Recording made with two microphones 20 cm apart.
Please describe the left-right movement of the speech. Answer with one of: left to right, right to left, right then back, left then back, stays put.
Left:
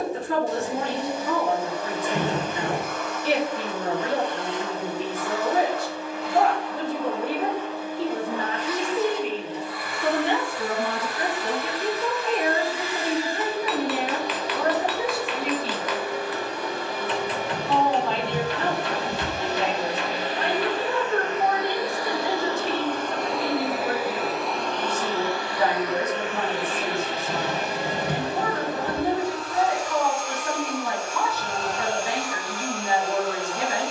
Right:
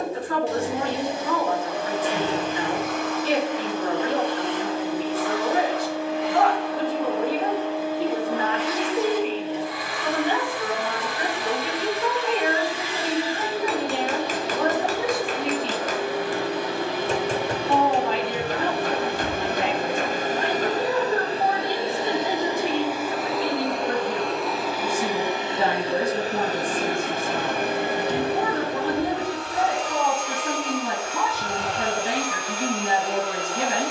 left to right.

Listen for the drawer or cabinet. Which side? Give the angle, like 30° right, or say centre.
60° left.